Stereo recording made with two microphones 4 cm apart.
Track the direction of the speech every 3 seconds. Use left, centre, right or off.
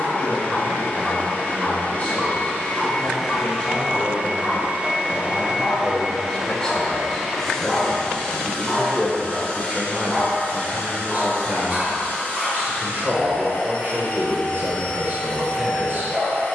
left, left, centre, right, right, right.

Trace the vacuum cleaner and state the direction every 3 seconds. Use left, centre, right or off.
left, right, centre, left, left, left.